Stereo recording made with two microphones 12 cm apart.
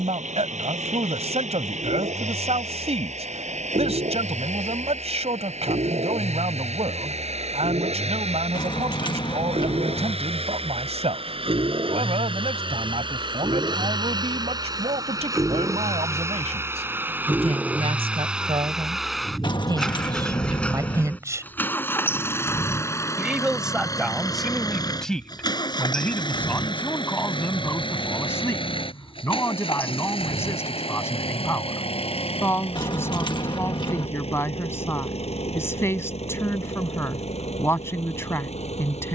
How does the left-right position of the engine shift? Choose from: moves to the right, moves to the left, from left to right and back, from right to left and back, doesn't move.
moves to the left.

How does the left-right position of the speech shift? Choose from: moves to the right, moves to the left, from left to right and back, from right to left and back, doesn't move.
moves to the left.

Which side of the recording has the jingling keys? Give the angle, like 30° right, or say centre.
40° left.